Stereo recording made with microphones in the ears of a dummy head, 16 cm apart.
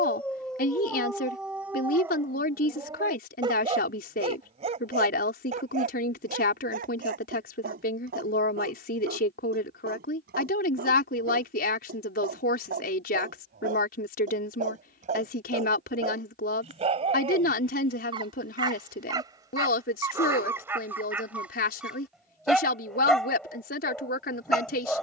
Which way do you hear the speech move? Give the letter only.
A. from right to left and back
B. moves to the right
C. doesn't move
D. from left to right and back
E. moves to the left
C.